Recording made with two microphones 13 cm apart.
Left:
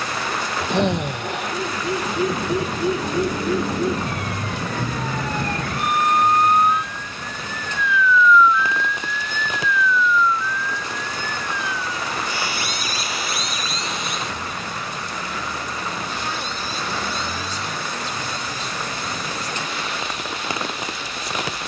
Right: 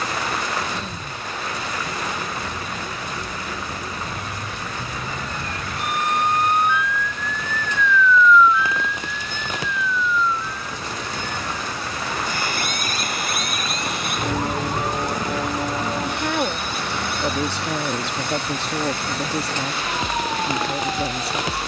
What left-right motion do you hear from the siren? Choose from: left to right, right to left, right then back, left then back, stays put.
left to right.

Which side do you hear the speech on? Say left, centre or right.
right.